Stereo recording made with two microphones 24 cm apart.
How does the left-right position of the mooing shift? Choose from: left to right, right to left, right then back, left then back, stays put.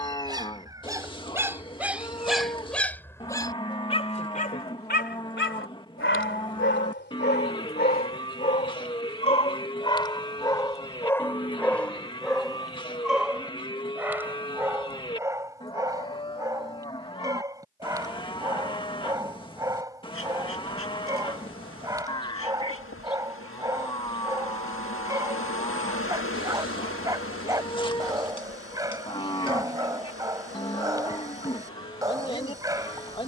stays put.